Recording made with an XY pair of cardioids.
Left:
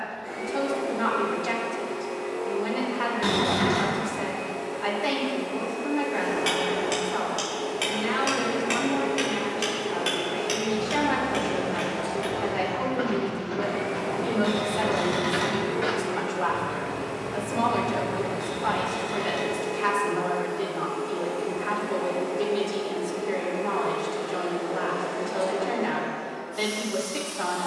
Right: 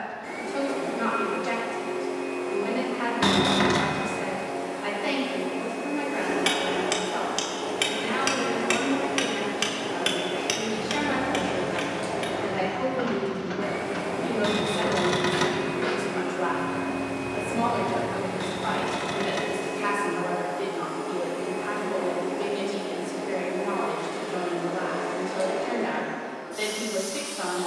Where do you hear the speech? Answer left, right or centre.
centre.